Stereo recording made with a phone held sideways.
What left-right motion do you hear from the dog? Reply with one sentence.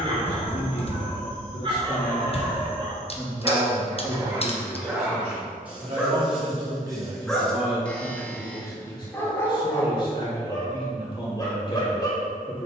In this clip you hear the dog move to the left.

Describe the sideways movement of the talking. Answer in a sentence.
In this clip you hear the talking move from left to right and back again.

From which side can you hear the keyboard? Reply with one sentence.
You can hear the keyboard on the left.